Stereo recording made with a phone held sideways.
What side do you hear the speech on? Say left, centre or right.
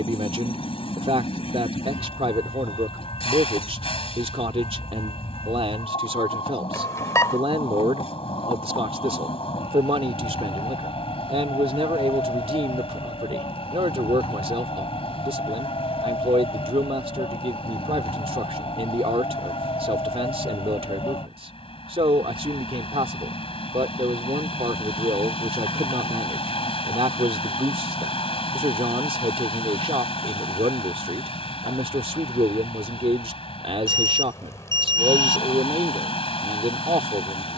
right.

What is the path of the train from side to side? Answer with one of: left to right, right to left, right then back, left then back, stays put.
stays put.